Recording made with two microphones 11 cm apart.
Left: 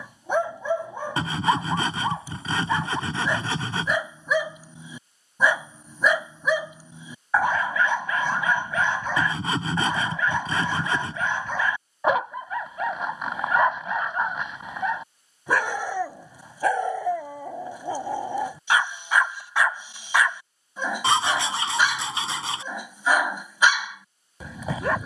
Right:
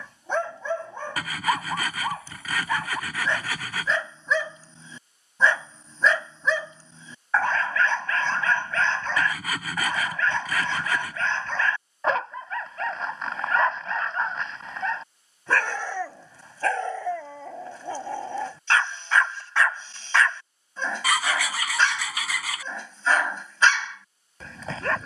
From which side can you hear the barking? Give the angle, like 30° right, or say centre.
10° left.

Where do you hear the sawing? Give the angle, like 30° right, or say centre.
30° left.